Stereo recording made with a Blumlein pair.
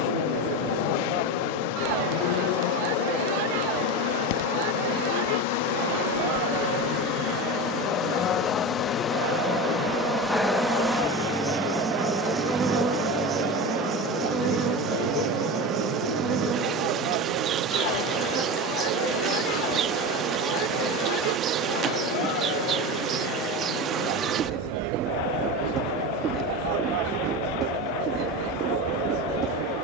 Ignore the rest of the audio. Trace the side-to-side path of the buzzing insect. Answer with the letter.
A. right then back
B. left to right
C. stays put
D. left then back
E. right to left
B.